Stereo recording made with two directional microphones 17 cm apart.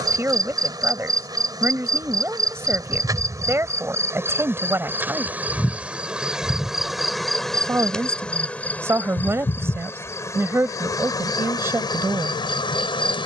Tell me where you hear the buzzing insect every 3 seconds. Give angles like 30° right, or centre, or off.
20° right, 10° right, centre, 20° left, 30° left.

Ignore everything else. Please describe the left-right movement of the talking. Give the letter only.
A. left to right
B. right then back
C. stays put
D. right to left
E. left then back
C.